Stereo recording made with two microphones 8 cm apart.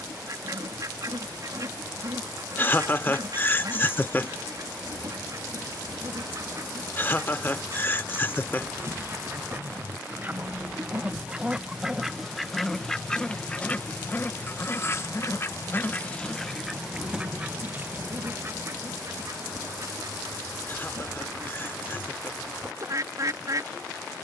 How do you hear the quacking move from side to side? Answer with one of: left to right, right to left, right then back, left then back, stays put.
left then back.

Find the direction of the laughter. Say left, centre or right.
left.